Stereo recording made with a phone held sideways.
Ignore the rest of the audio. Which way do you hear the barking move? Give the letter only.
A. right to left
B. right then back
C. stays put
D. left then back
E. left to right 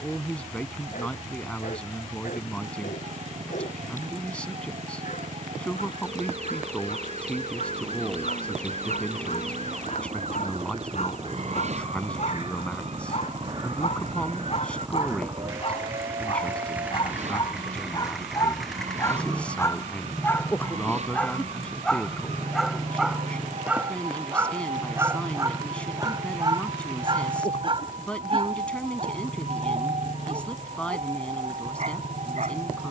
E.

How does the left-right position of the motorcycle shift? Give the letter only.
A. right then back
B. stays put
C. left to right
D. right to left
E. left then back
D.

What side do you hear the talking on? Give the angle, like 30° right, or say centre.
10° left.